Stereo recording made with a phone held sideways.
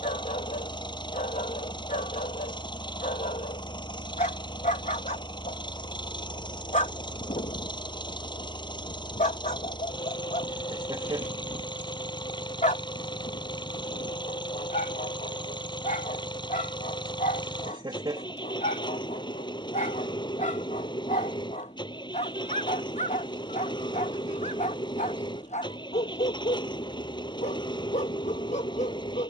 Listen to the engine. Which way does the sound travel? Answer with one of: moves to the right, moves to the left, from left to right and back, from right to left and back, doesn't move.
doesn't move.